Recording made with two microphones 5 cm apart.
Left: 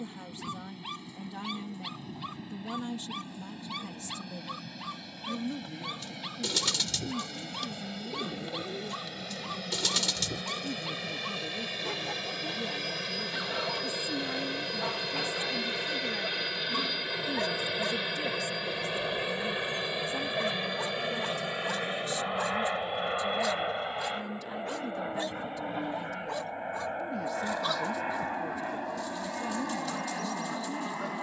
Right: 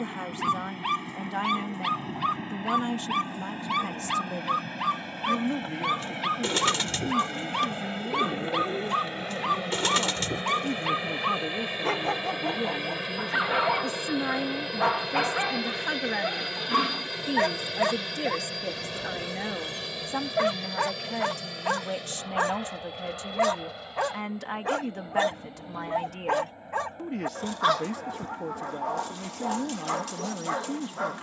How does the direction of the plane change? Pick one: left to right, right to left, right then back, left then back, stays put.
right to left.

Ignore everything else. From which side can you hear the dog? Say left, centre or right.
right.